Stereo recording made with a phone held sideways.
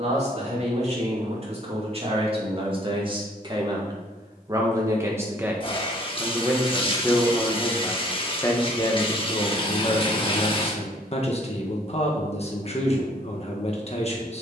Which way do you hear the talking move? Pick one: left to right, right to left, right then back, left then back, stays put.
right to left.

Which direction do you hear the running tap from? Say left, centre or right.
left.